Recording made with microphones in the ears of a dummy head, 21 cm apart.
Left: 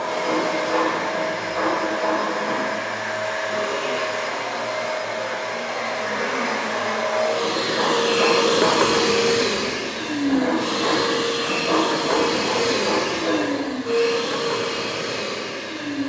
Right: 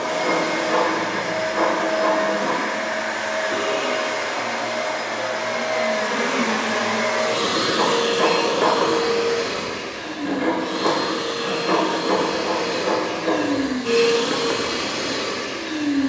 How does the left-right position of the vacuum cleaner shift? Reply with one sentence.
In this clip you hear the vacuum cleaner move from right to left and back again.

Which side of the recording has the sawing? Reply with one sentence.
You can hear the sawing on the right.